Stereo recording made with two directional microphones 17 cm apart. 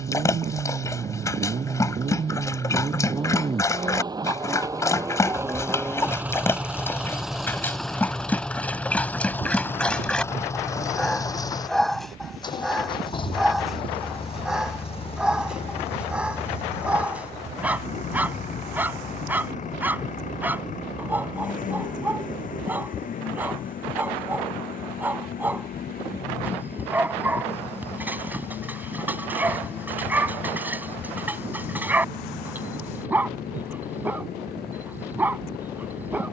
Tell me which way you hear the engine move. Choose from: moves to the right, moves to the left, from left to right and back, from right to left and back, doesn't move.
moves to the left.